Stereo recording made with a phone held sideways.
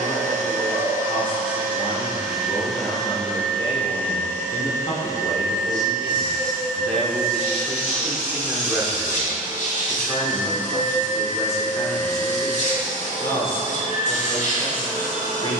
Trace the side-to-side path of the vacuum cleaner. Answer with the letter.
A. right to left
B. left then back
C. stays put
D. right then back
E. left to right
A.